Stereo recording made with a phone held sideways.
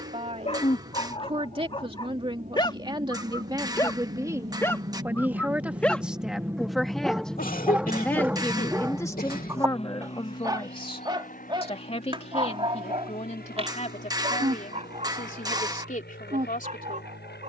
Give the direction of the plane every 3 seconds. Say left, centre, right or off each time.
right, right, centre, left, left, left.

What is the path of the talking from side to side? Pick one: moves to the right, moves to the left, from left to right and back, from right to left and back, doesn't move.
moves to the left.